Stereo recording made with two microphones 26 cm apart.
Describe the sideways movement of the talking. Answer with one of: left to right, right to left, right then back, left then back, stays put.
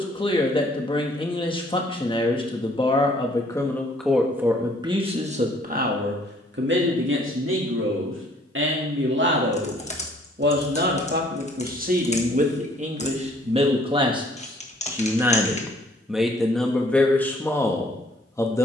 right then back.